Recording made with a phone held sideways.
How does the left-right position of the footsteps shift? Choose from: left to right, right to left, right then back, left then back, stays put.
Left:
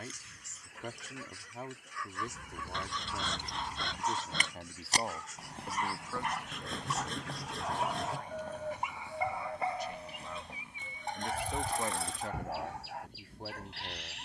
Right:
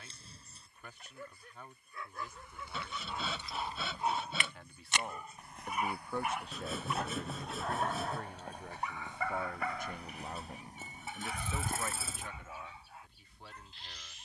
left to right.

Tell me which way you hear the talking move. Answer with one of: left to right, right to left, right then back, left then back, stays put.
right then back.